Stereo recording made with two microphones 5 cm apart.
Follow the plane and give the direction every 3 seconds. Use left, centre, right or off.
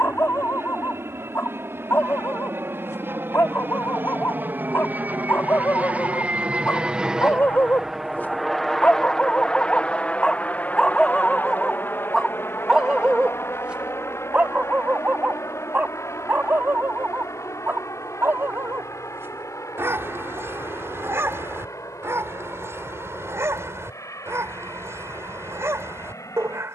right, right, centre, left, left, left, left, left, left.